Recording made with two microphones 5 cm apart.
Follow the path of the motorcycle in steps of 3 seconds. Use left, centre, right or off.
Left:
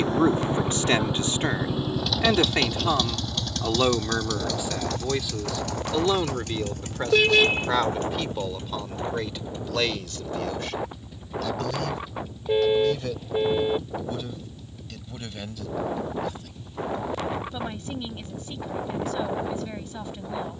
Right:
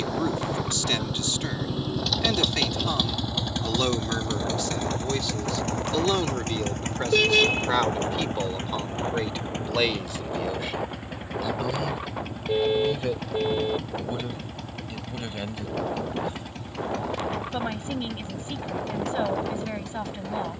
centre, right, right, right, right, right, right.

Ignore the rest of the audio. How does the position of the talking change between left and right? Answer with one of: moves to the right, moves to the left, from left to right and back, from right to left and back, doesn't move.
moves to the right.